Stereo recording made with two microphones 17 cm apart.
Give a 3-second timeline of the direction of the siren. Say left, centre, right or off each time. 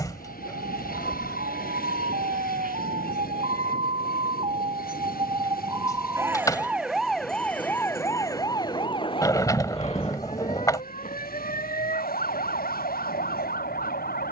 right, right, centre, left, left.